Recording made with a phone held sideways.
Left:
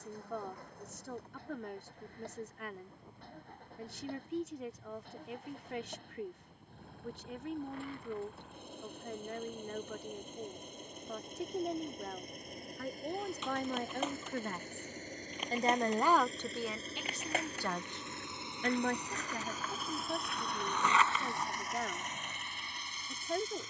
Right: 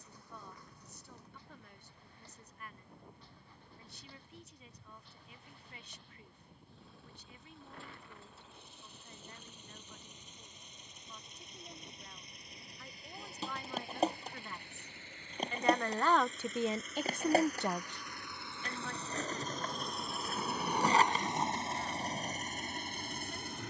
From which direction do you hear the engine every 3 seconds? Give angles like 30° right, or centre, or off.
60° left, 50° left, 50° left, 50° left, 40° left, 30° left, 10° left, 40° right.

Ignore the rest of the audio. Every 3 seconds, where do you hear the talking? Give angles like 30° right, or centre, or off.
70° left, 70° left, 70° left, 70° left, 60° left, 10° right, 60° left, 70° left.